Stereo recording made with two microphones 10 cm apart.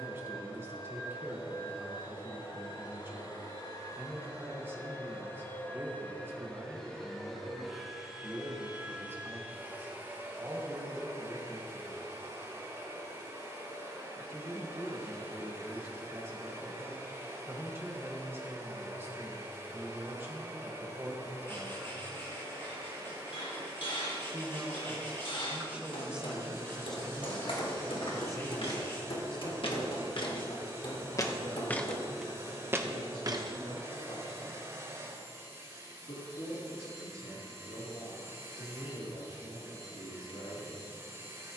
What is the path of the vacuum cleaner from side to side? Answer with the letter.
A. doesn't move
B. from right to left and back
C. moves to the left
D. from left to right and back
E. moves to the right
E.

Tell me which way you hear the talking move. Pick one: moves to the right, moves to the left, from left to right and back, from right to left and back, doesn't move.
moves to the left.